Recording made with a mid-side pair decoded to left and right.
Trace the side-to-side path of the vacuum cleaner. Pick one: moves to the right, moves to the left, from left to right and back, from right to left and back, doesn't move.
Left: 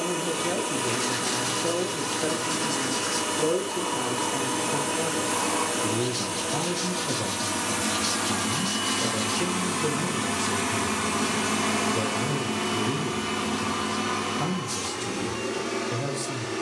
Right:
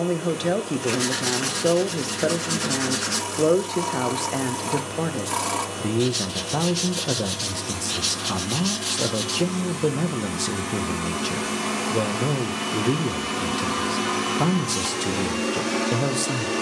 moves to the right.